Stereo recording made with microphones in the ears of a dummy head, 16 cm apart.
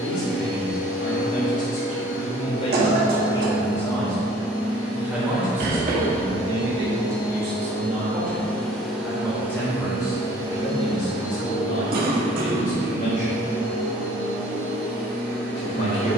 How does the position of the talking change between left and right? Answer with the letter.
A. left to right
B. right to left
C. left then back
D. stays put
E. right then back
E.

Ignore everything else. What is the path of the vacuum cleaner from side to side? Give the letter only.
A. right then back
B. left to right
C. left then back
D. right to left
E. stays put
B.